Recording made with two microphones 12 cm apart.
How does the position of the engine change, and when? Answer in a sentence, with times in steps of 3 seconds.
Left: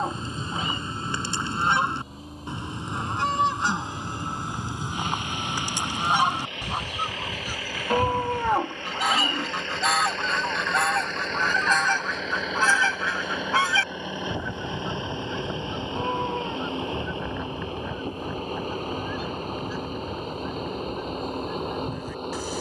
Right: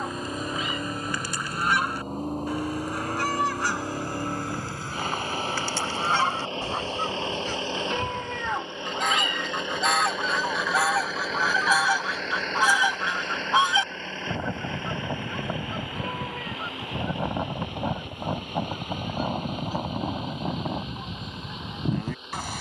In this clip you hear the engine on the right from 0 s, in the centre from 9 s and on the left from 15 s.